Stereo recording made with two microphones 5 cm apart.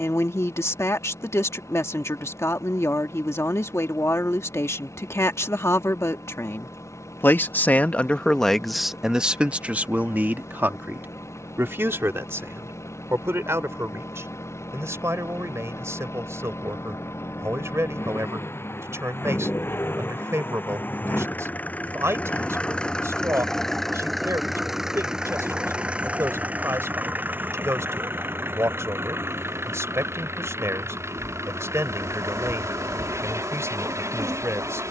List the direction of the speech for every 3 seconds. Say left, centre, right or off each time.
left, left, left, right, right, right, right, right, right, right, right, right.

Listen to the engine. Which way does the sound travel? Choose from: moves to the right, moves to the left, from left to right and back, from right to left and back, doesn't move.
moves to the right.